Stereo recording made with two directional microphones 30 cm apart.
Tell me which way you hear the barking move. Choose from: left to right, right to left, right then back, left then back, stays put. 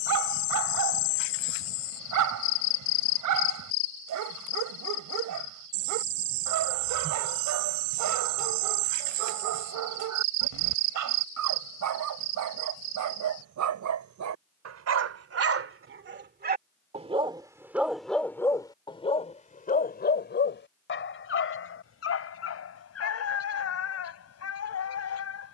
right to left.